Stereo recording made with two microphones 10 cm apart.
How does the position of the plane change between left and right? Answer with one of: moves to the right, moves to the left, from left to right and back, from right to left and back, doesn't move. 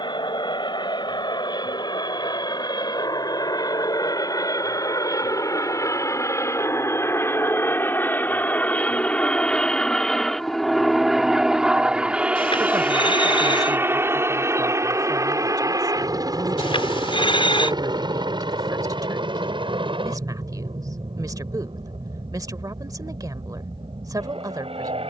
moves to the right.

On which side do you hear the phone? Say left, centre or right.
left.